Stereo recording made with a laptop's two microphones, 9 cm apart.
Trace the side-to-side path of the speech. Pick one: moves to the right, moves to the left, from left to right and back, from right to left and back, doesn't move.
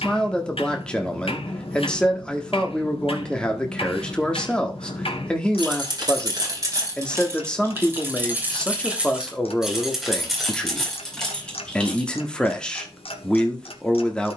doesn't move.